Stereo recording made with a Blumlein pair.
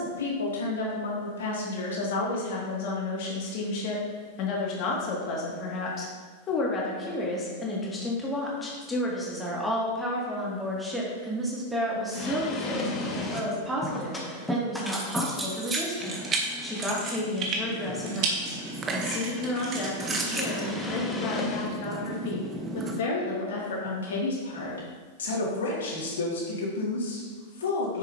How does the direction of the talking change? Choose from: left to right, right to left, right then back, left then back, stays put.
right then back.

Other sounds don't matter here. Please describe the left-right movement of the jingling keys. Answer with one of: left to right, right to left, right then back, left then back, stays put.
right then back.